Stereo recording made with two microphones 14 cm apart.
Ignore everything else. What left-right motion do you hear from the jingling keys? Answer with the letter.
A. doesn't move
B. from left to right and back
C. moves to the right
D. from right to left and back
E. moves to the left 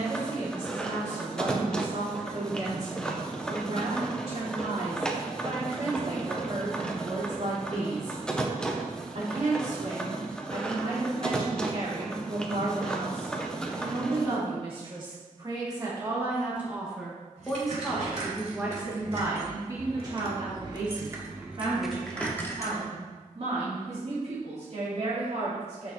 E.